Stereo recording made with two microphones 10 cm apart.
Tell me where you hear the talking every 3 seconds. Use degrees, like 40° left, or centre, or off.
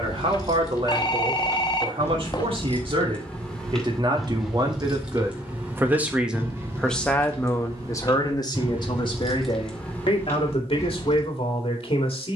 60° right, 40° right, 20° left, 60° left.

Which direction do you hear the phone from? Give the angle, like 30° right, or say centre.
40° left.